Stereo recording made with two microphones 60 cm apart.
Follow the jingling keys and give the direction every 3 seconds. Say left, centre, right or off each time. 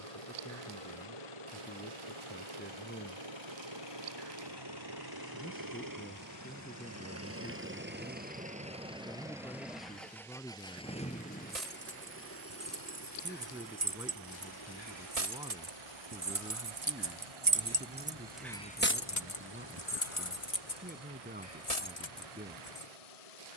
off, off, off, right, right, right, left, left.